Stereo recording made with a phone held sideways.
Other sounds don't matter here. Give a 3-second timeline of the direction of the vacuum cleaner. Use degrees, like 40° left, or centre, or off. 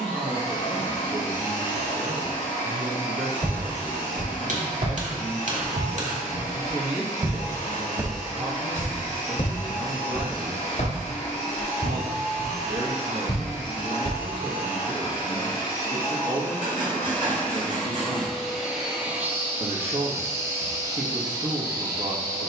70° left, 70° left, 60° left, 60° left, 40° left, 20° left, 10° right, 30° right.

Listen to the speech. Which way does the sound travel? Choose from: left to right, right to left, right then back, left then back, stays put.
stays put.